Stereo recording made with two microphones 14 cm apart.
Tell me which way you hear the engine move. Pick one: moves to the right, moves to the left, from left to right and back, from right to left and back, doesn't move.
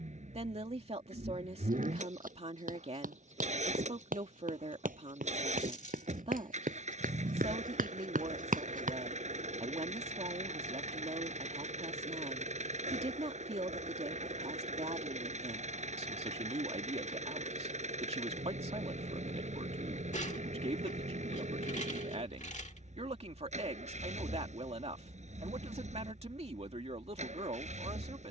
doesn't move.